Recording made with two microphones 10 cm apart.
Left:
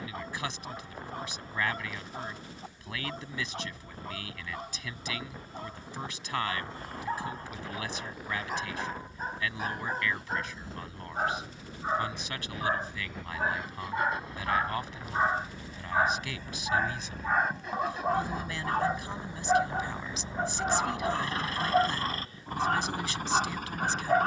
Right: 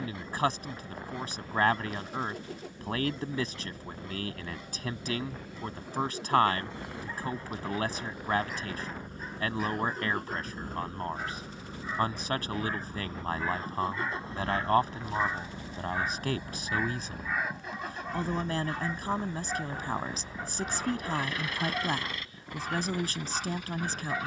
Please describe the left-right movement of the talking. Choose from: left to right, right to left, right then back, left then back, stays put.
stays put.